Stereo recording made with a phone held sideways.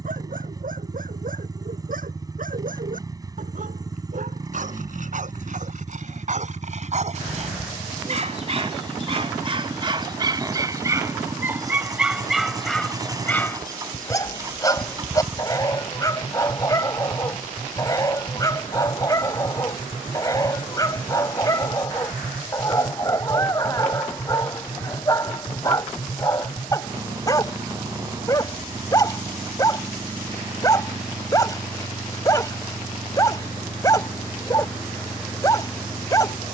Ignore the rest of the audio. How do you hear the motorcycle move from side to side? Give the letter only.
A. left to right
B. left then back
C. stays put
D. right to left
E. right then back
C.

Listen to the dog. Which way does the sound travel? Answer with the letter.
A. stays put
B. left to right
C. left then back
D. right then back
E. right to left
E.